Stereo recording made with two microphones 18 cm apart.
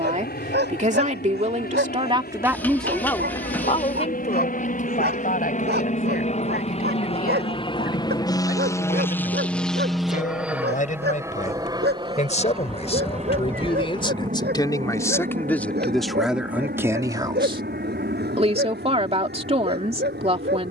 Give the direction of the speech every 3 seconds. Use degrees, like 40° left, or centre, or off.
30° right, 40° left, 50° left, 50° left, 30° left, 10° right, 30° right.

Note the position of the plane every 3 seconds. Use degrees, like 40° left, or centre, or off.
70° left, 50° left, 30° left, 10° right, 40° right, 50° right, 60° right.